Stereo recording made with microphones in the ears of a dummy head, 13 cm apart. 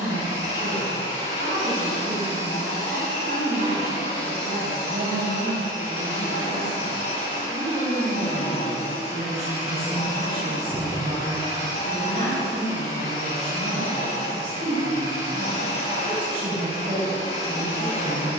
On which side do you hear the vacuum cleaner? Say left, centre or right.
left.